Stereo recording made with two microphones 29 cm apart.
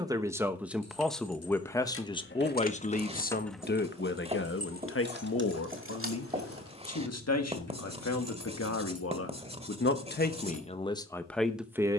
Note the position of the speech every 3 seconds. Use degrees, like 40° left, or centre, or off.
10° left, 40° left, 60° left, 20° left.